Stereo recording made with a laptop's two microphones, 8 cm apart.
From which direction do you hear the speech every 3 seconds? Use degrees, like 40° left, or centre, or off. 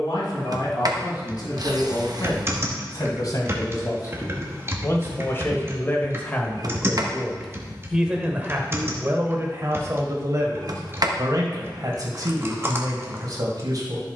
60° left, 40° left, centre, 40° right, 50° right.